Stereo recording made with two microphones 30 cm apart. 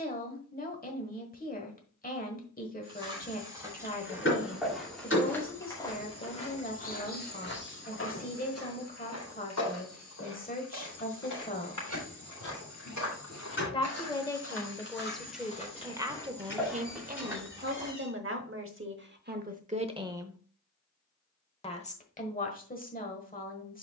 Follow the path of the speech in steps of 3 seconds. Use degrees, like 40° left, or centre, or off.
30° left, 30° left, 30° left, 30° left, 10° left, 20° right, 30° right, 30° left.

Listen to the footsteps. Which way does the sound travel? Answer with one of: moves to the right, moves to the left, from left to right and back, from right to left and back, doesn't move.
from right to left and back.